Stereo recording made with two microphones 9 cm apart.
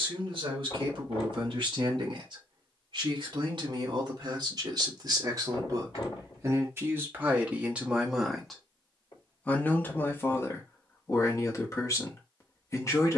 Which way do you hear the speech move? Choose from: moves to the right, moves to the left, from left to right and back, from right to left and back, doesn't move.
moves to the left.